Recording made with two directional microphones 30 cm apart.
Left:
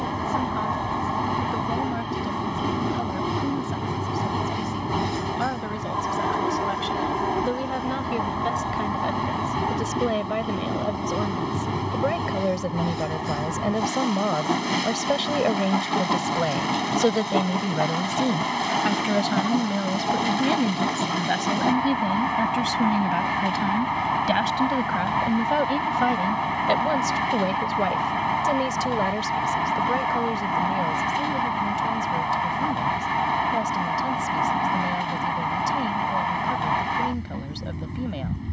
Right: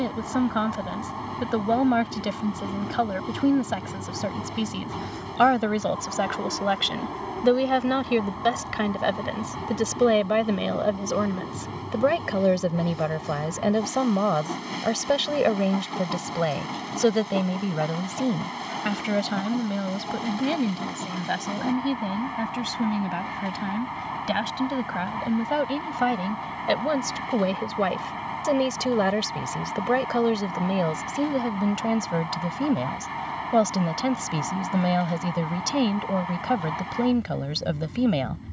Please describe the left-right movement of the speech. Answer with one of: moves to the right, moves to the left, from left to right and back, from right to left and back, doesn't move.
from right to left and back.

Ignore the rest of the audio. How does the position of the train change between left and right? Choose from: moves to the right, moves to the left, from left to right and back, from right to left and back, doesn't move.
doesn't move.